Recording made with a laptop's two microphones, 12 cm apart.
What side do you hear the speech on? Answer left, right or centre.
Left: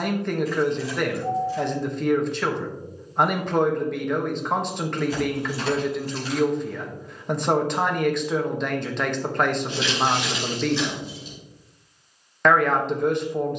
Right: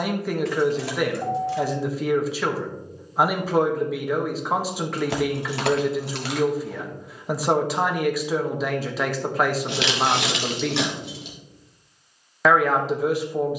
centre.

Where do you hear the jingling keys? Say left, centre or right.
right.